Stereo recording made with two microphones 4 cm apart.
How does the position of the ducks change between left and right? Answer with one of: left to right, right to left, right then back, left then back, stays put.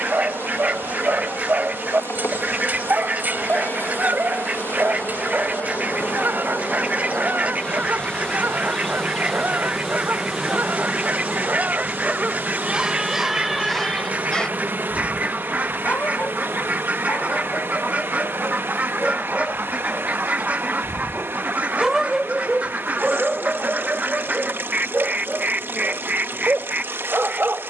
stays put.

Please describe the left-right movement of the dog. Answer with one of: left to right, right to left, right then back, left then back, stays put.
left then back.